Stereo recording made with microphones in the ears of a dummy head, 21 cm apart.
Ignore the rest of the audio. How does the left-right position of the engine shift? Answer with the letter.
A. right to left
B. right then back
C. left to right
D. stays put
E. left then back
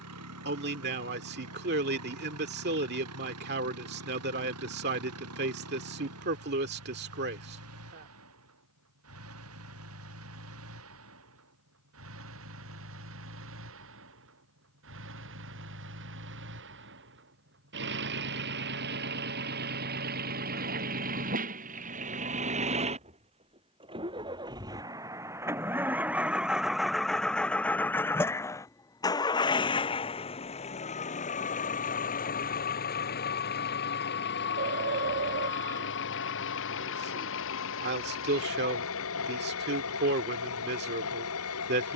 A.